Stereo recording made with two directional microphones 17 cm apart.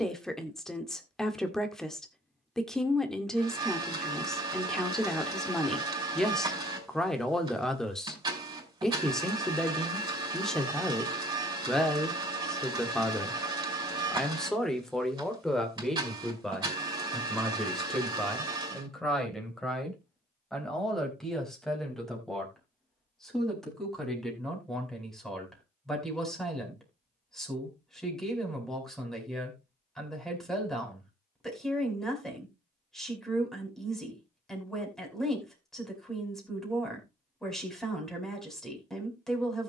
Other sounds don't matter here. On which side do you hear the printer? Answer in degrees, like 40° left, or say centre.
20° right.